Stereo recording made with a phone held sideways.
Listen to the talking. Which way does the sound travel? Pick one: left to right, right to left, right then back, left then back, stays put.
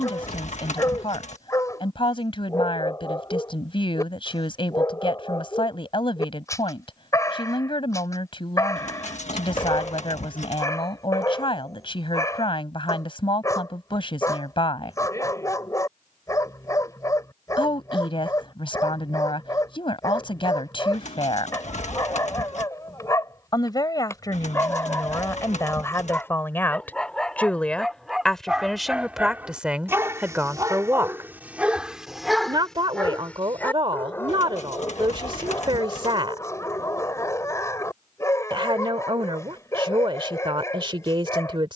left to right.